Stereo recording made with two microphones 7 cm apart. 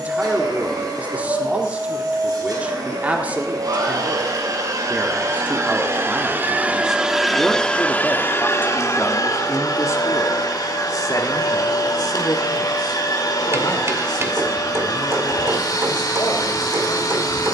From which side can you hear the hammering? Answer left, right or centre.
right.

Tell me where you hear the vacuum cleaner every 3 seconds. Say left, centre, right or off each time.
right, right, centre, left, left, left.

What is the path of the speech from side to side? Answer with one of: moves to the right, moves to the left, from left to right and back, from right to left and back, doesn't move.
moves to the left.